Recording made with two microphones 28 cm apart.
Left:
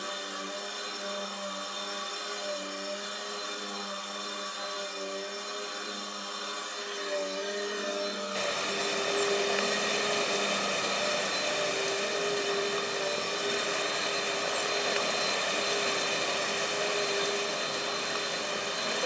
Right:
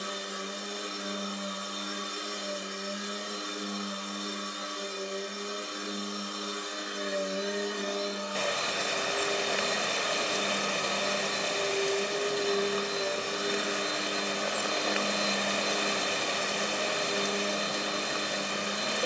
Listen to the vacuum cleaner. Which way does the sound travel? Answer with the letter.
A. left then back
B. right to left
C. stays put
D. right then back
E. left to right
A.